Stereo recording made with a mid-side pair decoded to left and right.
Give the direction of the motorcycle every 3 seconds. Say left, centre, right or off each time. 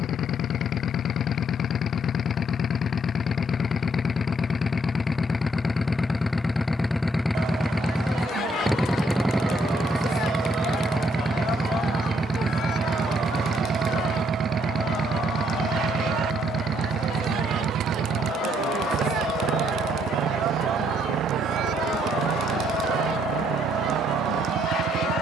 left, left, centre, centre, right, right, right, right, right.